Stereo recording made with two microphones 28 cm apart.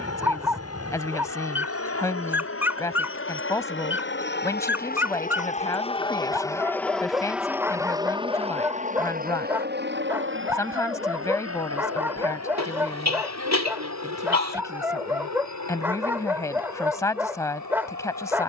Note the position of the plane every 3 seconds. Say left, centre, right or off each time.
left, left, centre, right, right, right.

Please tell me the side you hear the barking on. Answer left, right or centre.
centre.